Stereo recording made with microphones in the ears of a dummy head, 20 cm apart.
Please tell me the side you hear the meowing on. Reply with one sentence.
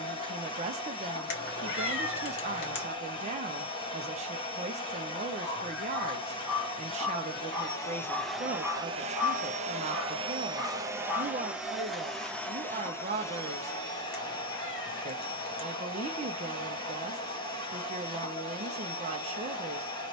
You can hear the meowing on the left.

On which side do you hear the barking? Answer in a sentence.
You can hear the barking in the centre.